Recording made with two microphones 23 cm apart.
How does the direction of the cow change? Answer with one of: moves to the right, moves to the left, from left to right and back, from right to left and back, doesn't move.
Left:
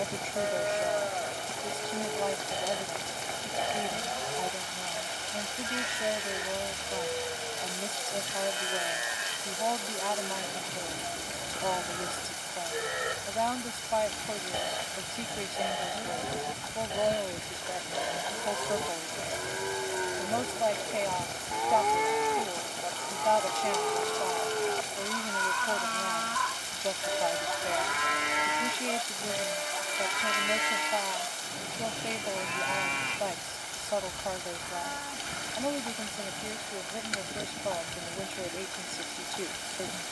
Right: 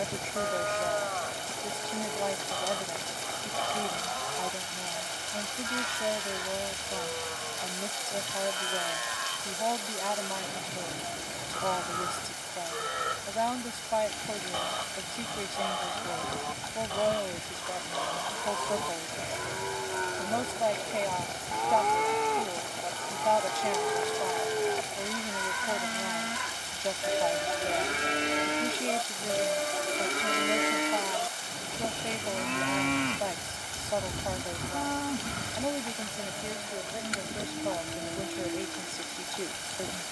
moves to the right.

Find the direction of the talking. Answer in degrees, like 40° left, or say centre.
centre.